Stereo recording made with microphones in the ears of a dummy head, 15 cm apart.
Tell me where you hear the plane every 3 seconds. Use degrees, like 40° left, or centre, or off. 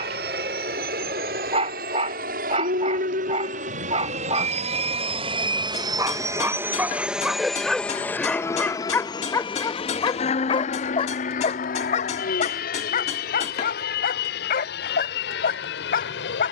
60° right, 40° right, centre, 40° left, 60° left, 60° left.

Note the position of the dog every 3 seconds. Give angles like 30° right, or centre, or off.
40° right, 30° right, centre, 30° left, 50° left, 60° left.